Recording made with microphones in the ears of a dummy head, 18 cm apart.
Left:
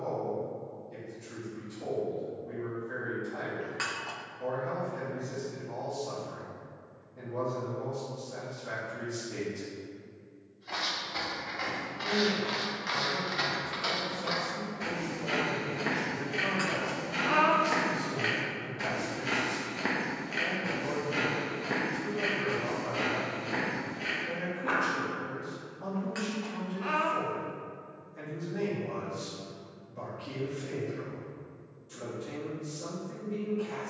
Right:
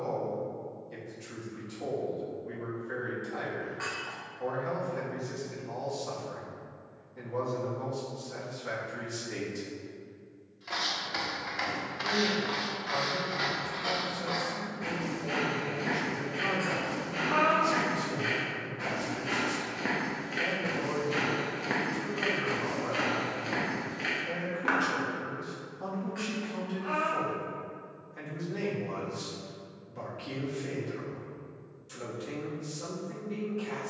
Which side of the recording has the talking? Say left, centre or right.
right.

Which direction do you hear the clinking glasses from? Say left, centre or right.
left.